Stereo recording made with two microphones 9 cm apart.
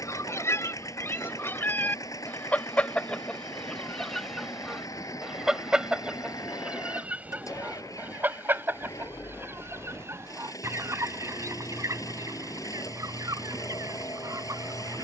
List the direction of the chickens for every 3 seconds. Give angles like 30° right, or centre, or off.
20° left, centre, 20° right, 30° right, 40° right.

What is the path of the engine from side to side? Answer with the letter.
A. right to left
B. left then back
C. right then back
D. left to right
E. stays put
E.